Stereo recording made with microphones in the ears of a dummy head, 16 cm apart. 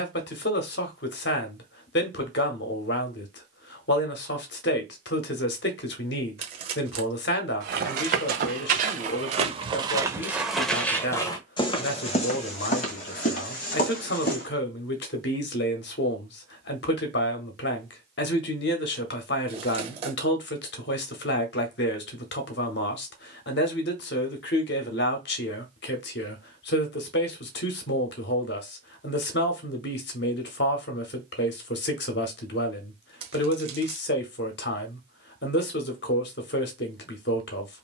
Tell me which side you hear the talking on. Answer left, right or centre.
left.